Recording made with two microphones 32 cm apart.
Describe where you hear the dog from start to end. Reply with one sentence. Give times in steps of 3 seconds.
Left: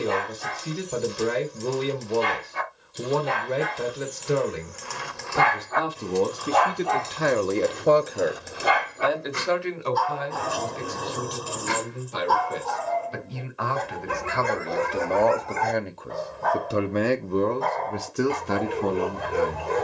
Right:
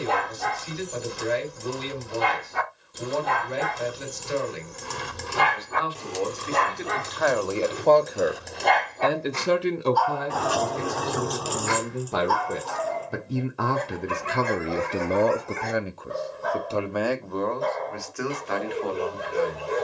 You can hear the dog on the right from 0 s, in the centre from 6 s and on the left from 9 s.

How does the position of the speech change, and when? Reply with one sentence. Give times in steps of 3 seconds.
In this clip you hear the speech on the left from 0 s, on the right from 9 s, in the centre from 15 s and on the left from 18 s.